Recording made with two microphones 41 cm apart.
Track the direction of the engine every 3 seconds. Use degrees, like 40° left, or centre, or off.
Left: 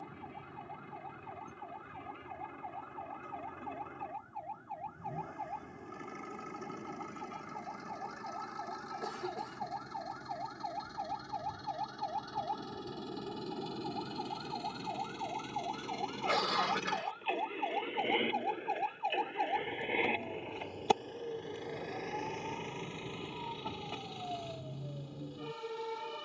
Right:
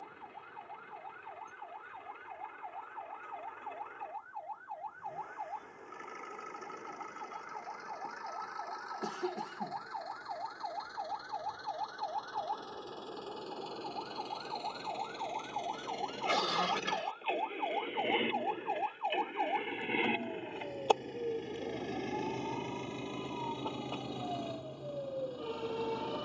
60° left, 60° left, 50° left, 50° left, 30° left, 10° left, 20° right, 50° right, 70° right.